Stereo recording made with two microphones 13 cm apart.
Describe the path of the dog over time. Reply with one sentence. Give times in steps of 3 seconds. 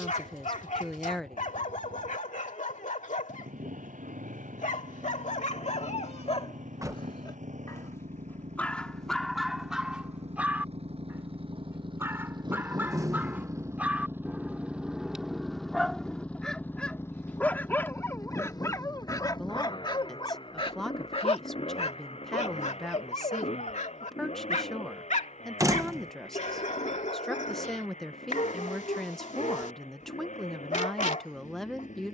In this clip you hear the dog on the left from 0 s, in the centre from 9 s and on the left from 18 s.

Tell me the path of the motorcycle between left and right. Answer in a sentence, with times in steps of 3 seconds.
You can hear the motorcycle on the right from 0 s, in the centre from 15 s and on the left from 18 s.